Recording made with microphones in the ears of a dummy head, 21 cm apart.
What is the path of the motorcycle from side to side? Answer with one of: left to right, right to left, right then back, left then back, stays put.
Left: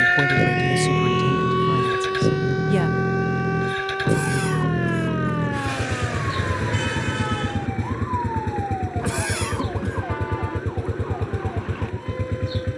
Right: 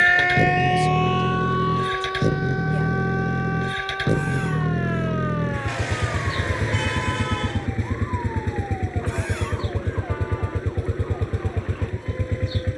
stays put.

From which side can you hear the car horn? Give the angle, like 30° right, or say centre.
10° left.